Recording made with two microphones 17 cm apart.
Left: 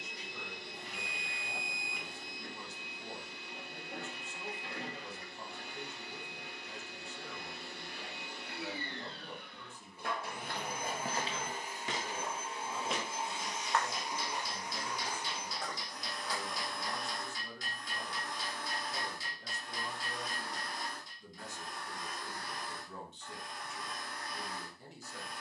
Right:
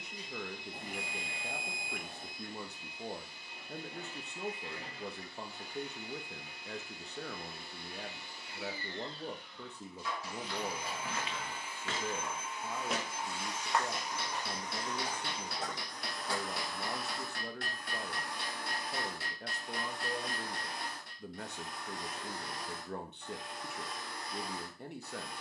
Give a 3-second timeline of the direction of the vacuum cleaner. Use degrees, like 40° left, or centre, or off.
70° left, 70° left, 70° left, 50° left, 20° left, centre, 20° right, 20° right, 30° right.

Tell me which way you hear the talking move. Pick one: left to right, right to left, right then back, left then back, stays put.
stays put.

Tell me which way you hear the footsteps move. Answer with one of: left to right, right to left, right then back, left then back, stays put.
left to right.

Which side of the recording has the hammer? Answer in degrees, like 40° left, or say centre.
60° right.